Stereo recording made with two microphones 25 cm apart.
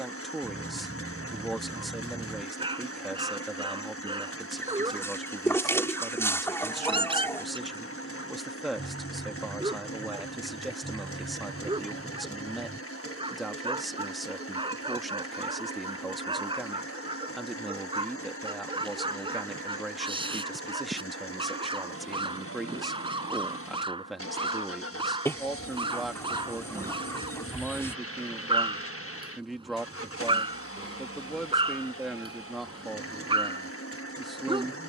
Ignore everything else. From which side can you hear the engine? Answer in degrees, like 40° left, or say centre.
60° left.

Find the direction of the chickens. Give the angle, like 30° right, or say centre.
10° left.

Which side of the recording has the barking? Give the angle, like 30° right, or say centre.
20° right.